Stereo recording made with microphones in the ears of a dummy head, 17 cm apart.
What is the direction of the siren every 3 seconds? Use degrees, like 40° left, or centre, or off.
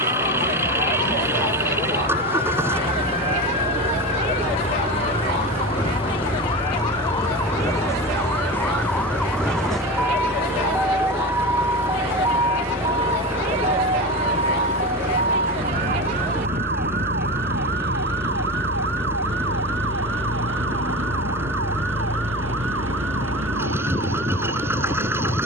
40° left, 30° left, 20° left, centre, 30° right, 50° right, 60° right, 70° right, 70° right.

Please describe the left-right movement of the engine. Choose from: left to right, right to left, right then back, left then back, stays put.
stays put.